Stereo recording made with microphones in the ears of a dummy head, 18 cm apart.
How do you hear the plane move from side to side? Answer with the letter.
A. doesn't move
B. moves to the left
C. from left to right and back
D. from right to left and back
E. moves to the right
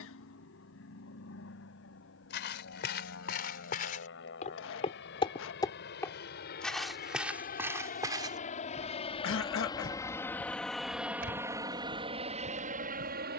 E.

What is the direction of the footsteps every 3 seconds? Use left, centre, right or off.
left, left, centre, right, right.